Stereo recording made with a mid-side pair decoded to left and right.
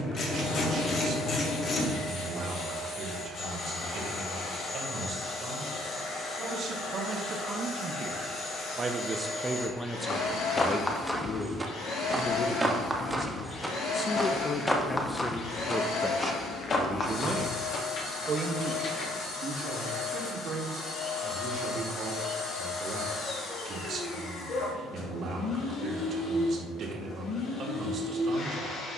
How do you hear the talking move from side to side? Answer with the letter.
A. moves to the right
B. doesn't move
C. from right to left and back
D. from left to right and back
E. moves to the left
C.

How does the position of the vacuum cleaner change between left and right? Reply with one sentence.
In this clip you hear the vacuum cleaner stay in one place.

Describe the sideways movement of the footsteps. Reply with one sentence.
You can hear the footsteps go right and come back.